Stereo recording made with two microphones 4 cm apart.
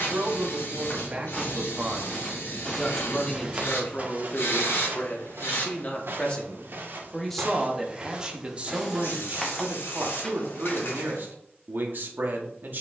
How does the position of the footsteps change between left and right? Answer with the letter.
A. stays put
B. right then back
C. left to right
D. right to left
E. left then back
B.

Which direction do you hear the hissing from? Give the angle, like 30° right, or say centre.
70° left.